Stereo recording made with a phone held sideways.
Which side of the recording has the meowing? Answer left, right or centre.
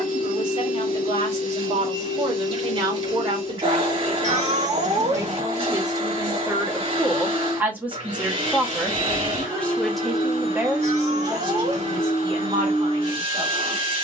right.